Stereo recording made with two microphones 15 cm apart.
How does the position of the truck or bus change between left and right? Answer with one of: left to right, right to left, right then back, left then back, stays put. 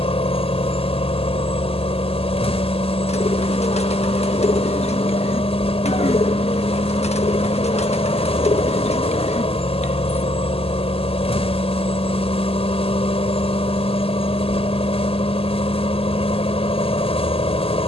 stays put.